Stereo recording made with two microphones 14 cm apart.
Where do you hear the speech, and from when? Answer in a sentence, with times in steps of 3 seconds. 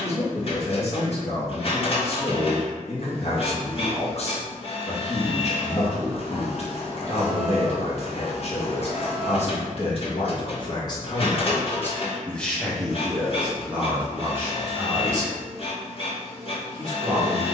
You can hear the speech on the left from 0 s, in the centre from 12 s and on the right from 15 s.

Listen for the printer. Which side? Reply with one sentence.
In this clip you hear the printer on the left.